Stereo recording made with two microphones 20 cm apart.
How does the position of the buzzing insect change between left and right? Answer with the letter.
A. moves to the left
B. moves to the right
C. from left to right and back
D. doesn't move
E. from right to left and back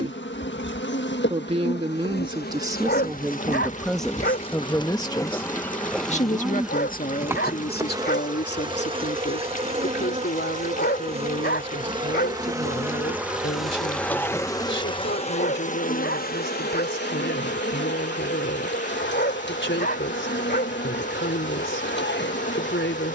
C.